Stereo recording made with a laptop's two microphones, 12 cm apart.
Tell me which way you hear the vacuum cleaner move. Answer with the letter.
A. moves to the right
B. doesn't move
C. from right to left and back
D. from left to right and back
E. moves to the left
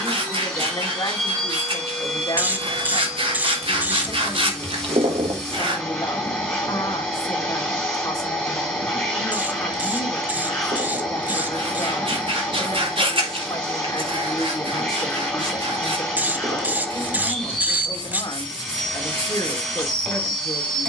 B.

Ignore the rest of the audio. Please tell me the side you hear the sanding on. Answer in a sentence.
In this clip you hear the sanding on the right.